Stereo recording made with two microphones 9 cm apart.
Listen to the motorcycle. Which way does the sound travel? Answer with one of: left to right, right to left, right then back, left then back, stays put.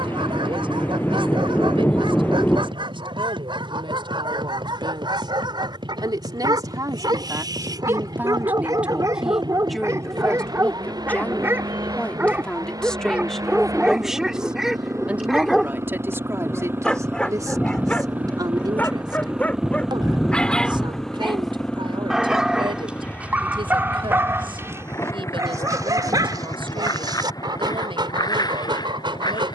right to left.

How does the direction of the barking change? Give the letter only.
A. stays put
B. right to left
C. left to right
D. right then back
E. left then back
E.